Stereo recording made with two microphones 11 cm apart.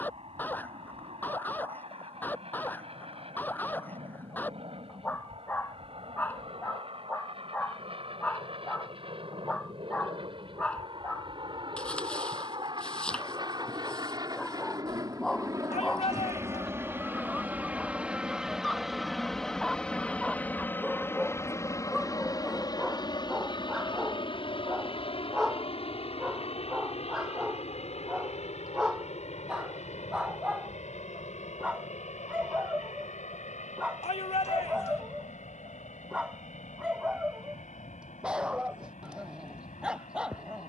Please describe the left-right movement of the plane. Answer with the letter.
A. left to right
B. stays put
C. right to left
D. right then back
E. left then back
C.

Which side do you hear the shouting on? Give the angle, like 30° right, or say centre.
70° left.